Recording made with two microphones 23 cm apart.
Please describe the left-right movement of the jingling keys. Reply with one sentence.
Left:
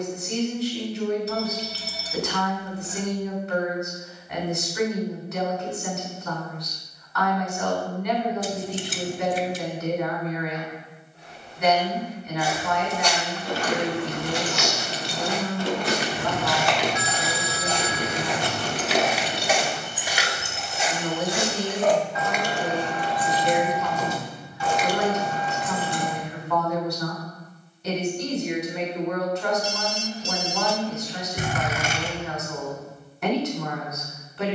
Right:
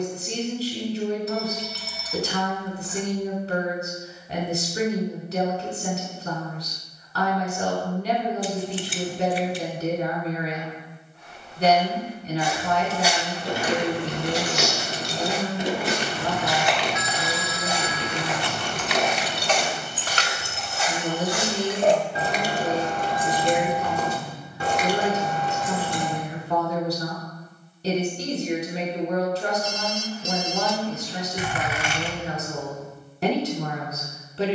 You can hear the jingling keys go left and come back.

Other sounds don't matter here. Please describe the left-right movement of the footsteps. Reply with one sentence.
In this clip you hear the footsteps go right and come back.